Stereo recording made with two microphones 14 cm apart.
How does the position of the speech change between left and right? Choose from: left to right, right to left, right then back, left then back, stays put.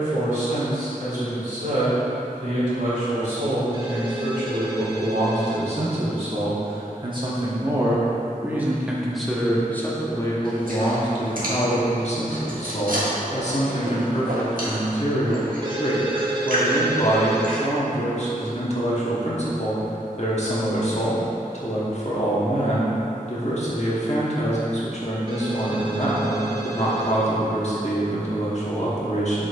right to left.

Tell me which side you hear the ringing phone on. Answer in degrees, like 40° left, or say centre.
40° right.